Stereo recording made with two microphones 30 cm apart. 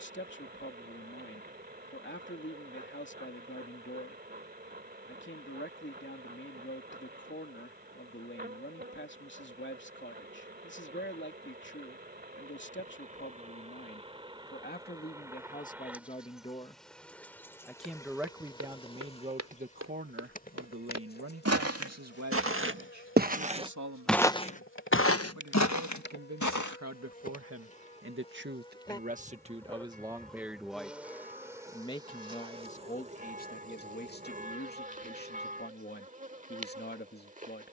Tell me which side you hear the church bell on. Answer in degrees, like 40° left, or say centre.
30° right.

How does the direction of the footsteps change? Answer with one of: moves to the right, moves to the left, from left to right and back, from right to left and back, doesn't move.
moves to the left.